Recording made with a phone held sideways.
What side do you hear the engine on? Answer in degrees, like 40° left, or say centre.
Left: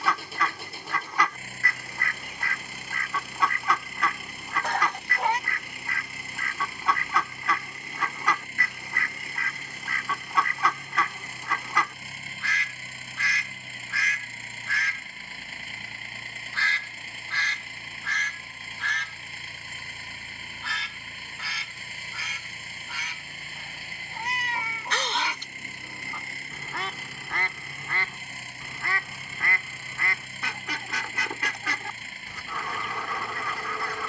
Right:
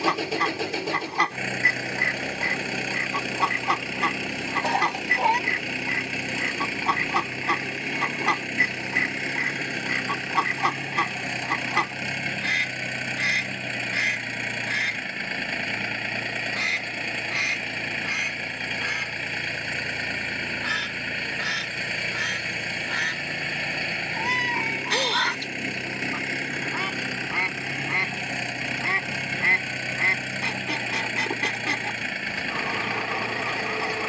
90° right.